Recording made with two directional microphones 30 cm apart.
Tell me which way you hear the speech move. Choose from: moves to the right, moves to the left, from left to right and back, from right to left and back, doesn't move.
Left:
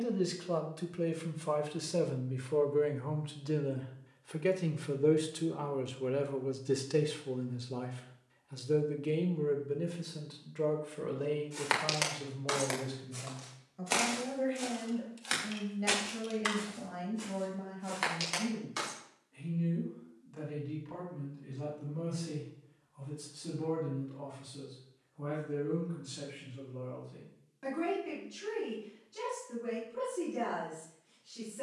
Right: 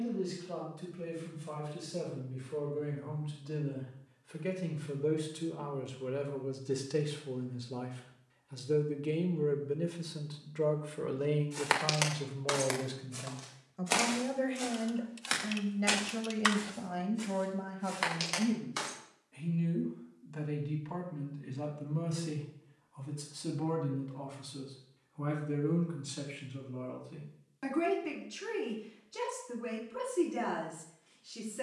moves to the right.